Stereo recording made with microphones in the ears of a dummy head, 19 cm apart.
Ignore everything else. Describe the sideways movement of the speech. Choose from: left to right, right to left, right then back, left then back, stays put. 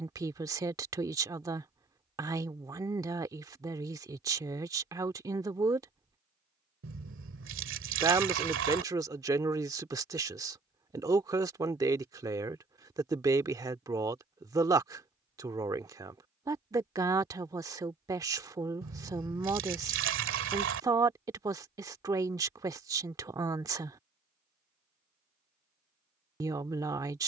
stays put.